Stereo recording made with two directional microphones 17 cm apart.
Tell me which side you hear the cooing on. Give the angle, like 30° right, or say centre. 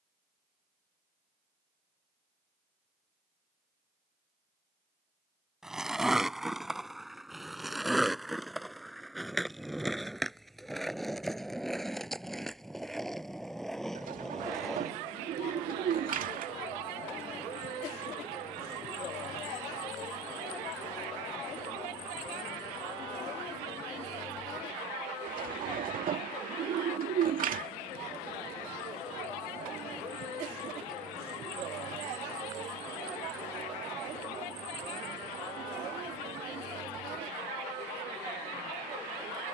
50° right.